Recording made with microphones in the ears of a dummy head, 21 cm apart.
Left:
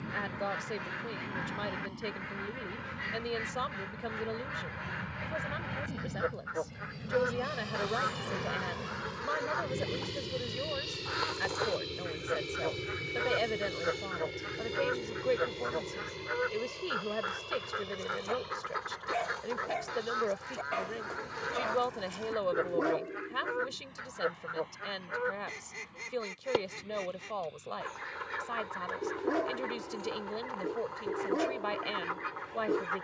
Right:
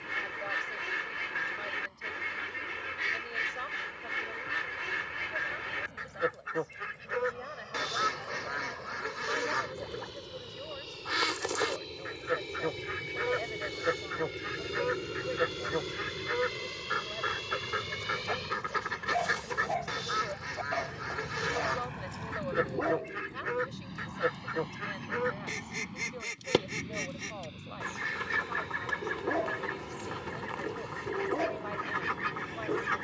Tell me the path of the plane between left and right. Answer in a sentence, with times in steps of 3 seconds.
In this clip you hear the plane on the left from 0 s, in the centre from 12 s and on the right from 15 s.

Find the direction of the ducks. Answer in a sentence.
You can hear the ducks on the right.